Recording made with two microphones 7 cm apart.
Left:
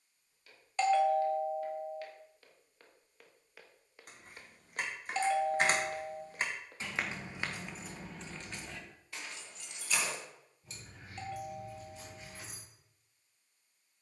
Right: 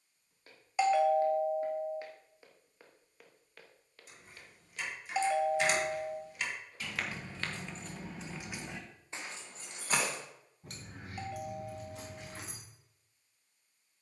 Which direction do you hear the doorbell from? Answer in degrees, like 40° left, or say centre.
10° right.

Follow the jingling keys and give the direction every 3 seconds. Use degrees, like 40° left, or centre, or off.
off, 50° left, 10° left, 50° right, 70° right.